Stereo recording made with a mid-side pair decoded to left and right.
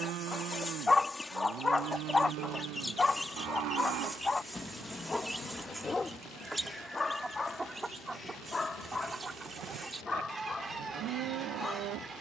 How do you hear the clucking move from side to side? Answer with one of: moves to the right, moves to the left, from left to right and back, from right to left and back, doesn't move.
moves to the right.